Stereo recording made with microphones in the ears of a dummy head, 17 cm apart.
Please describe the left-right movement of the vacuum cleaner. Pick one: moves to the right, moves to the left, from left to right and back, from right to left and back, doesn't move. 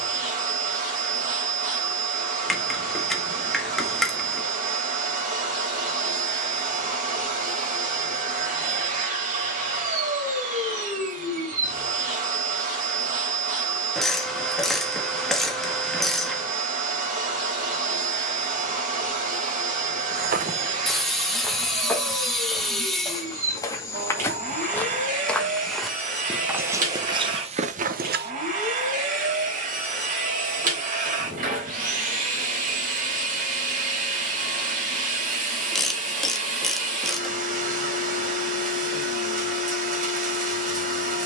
doesn't move.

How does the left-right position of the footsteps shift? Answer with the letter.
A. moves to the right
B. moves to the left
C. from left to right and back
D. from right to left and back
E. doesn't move
D.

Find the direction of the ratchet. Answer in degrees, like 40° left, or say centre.
centre.